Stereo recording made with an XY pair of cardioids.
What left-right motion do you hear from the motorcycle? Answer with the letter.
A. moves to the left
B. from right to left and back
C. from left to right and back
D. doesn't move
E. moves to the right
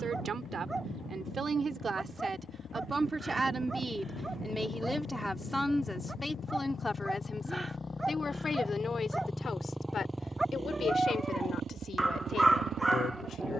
E.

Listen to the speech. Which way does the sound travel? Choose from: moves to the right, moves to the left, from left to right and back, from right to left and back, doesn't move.
moves to the left.